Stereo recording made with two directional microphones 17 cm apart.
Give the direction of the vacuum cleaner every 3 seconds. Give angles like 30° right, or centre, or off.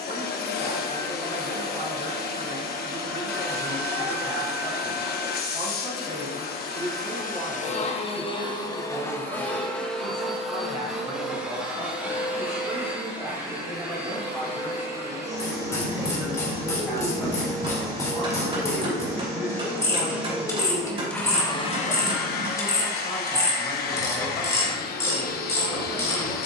60° left, 60° left, 50° left, centre, 10° right, 20° right, 10° right, 50° left, 60° left.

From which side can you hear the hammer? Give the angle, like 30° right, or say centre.
30° right.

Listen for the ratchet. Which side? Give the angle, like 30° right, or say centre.
20° left.